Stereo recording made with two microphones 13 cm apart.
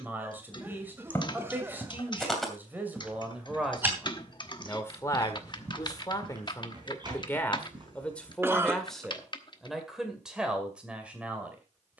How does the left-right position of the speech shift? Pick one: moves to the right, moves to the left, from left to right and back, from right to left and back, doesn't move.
from right to left and back.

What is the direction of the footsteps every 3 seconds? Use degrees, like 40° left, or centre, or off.
10° left, 20° right, 40° right, off.